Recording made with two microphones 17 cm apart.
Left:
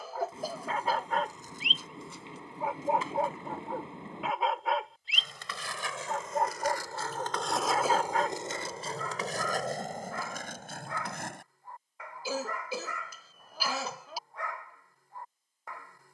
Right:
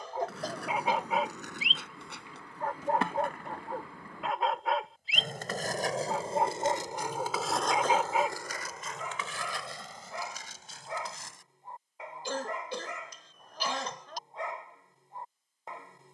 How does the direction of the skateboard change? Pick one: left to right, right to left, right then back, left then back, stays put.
right to left.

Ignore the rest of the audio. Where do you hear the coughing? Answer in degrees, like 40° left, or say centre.
10° left.